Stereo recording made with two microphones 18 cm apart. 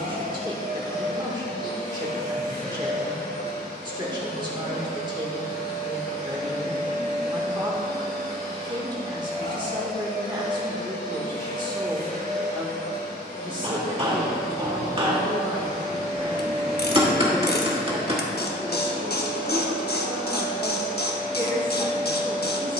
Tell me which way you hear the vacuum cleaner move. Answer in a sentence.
In this clip you hear the vacuum cleaner stay put.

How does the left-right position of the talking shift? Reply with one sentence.
You can hear the talking stay put.